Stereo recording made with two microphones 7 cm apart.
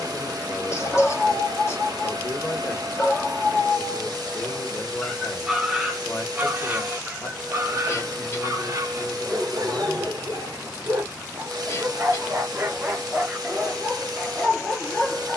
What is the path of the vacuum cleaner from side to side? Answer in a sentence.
You can hear the vacuum cleaner stay put.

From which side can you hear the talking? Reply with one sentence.
You can hear the talking on the left.